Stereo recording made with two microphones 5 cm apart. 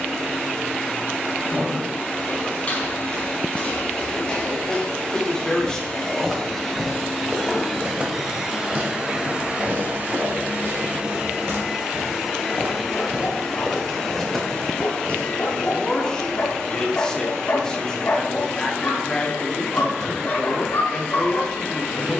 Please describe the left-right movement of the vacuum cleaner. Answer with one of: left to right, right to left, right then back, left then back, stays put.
right then back.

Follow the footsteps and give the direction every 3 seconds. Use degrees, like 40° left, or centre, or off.
30° left, 20° left, 20° right, 60° right, 20° right, 30° left, off, off.